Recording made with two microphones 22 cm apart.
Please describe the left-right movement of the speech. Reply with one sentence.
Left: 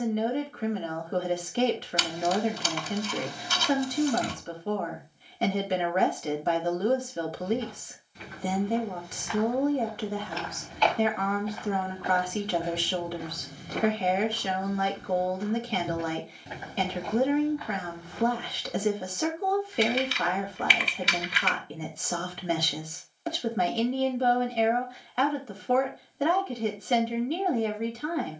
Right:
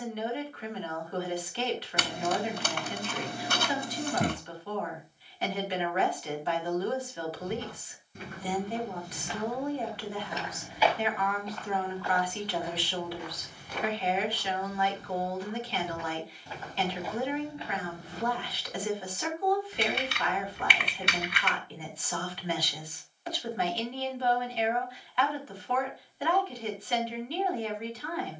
In this clip you hear the speech stay put.